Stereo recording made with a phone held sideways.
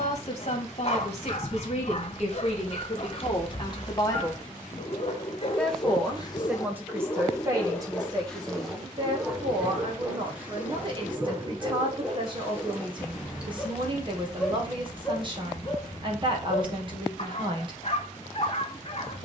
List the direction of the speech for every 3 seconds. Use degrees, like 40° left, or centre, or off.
50° left, 30° left, 20° right, 40° right, 40° right, 40° right, off.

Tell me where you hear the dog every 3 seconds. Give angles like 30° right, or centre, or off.
40° left, 40° left, 20° left, 10° right, 10° right, 40° left, 40° left.